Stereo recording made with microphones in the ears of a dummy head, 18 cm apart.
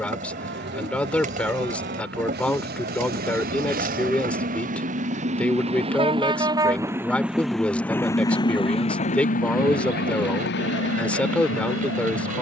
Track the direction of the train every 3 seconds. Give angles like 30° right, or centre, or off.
60° right, 40° right, centre, 60° left.